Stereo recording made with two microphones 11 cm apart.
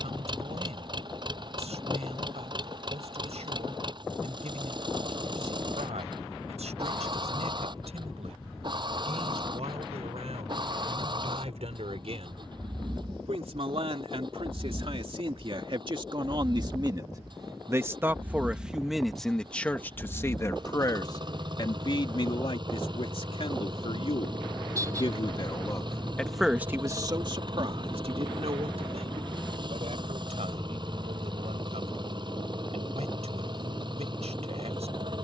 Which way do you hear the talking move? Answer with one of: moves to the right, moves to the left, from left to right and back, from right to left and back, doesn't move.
from right to left and back.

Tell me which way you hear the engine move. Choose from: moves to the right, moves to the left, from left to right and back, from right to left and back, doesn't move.
doesn't move.